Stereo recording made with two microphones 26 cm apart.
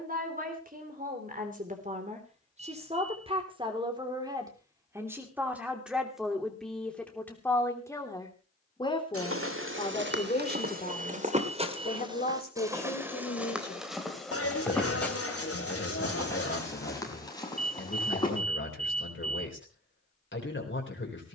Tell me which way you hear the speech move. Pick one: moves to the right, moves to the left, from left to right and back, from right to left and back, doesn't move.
moves to the left.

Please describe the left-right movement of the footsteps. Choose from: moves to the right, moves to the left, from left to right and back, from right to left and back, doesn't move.
moves to the left.